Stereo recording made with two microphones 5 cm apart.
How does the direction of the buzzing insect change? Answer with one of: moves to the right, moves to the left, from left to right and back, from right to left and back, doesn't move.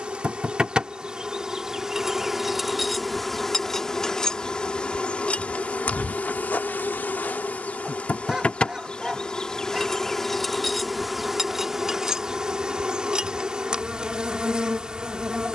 from right to left and back.